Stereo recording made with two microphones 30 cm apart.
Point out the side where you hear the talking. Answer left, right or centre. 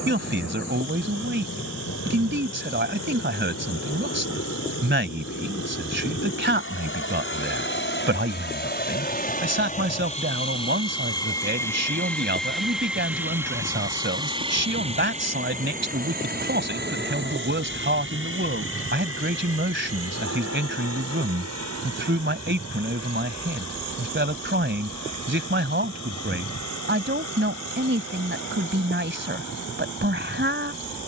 right.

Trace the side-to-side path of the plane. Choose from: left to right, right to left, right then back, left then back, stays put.
left to right.